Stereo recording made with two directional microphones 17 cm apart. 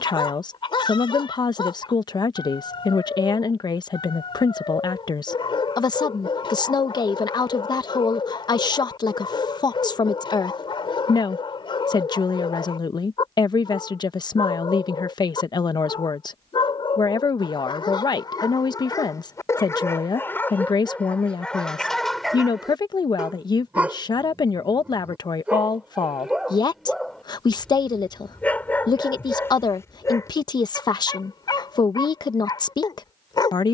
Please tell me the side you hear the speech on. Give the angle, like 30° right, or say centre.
20° left.